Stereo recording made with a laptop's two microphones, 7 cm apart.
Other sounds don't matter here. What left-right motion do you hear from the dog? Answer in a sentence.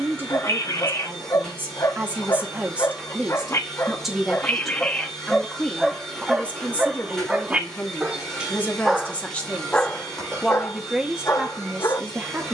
You can hear the dog go right and come back.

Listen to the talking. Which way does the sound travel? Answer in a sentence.
You can hear the talking go left and come back.